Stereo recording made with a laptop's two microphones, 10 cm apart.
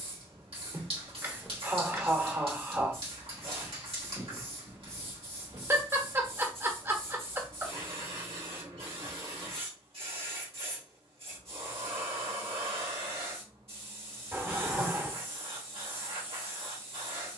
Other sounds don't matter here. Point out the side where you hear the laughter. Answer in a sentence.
You can hear the laughter on the right.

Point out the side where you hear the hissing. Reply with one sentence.
In this clip you hear the hissing on the right.